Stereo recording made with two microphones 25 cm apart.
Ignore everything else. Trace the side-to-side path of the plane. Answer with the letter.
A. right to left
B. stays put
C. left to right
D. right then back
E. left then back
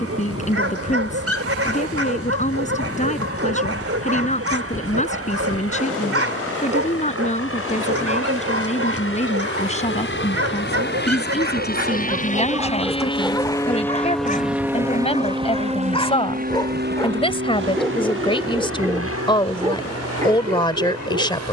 C.